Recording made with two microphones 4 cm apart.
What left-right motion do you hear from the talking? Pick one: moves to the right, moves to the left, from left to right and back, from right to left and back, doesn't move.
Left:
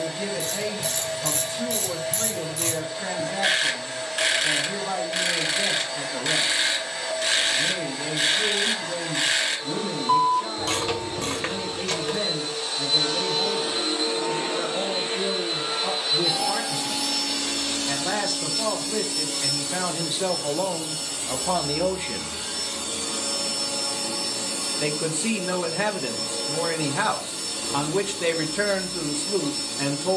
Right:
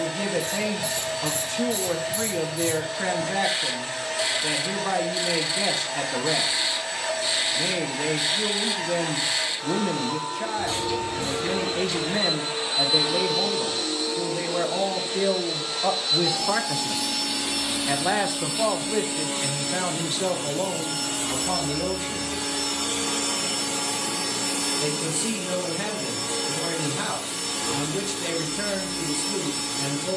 moves to the left.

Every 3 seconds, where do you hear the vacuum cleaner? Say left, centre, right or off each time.
right, right, right, right, centre, centre, right, right, right, right.